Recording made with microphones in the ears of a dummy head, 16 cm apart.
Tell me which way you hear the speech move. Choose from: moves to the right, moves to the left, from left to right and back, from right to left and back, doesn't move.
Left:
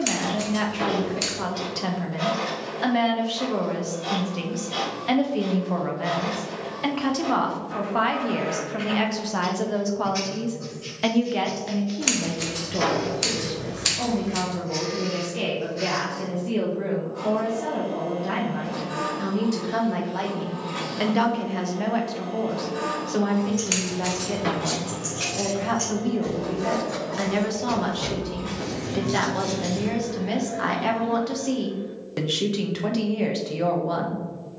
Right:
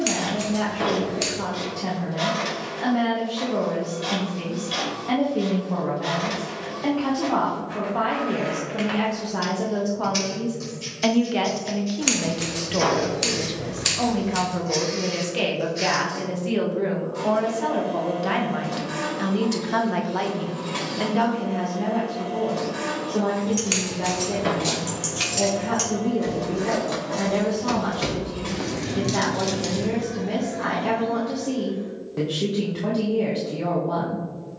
from left to right and back.